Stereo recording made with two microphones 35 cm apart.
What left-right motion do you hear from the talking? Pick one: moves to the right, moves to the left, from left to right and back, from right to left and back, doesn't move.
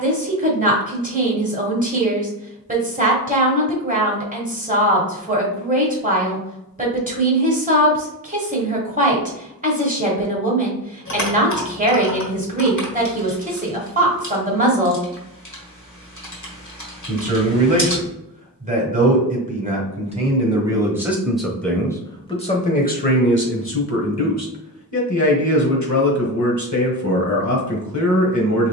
moves to the left.